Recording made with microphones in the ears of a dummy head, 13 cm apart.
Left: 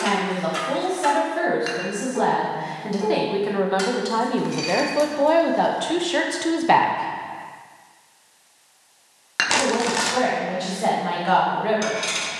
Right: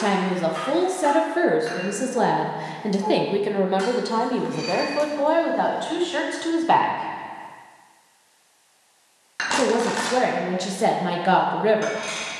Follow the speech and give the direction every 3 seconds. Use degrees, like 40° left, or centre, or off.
50° right, centre, 10° left, 50° right.